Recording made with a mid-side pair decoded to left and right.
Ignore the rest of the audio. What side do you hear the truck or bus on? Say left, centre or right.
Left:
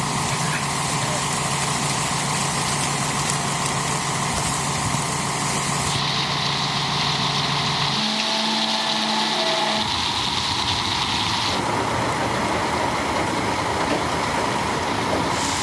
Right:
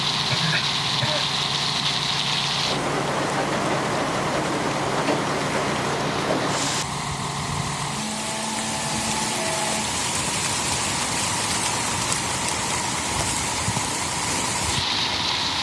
left.